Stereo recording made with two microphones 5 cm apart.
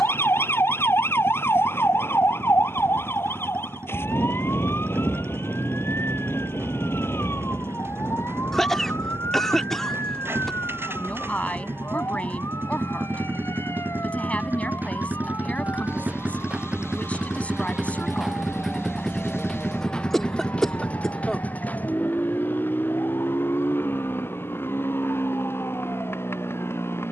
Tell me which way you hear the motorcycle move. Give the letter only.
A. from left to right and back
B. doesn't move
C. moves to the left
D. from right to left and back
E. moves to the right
C.